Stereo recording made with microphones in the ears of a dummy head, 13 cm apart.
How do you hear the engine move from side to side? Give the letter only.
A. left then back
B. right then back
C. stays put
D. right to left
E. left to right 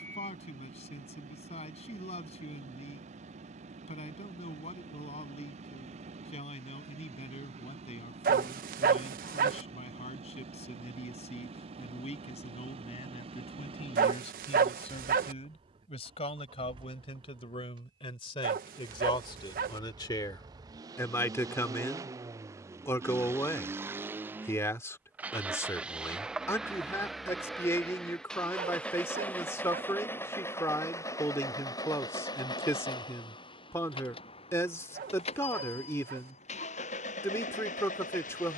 D.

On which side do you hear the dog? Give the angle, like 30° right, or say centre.
60° right.